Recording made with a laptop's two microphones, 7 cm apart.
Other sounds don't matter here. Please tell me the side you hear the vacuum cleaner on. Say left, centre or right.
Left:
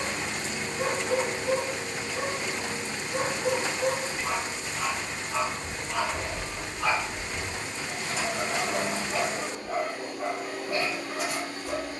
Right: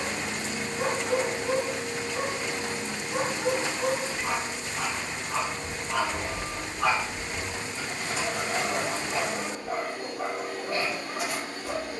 right.